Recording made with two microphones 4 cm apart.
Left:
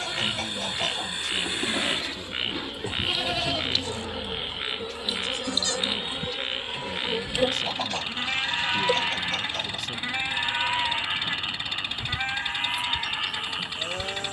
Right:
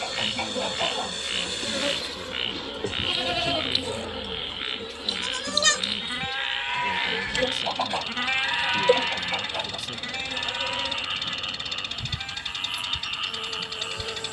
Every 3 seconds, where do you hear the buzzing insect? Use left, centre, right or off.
right, centre, centre, right, right.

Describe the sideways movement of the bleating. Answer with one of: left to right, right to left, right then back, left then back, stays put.
right then back.